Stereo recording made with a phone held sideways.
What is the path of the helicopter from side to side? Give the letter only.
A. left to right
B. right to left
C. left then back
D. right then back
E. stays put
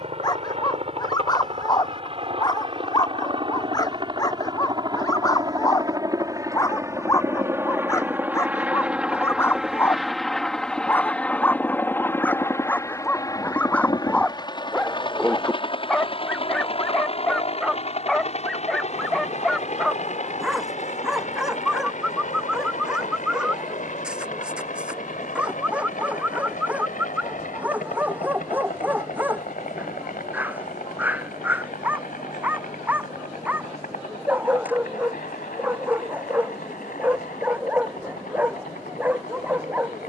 B.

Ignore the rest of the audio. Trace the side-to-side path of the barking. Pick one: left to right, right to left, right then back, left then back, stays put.
left to right.